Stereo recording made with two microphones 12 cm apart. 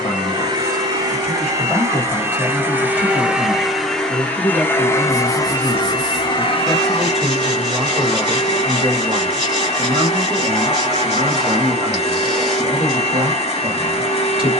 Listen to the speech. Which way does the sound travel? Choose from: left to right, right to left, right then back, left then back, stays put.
left to right.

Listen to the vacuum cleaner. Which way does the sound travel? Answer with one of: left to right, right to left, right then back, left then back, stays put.
right to left.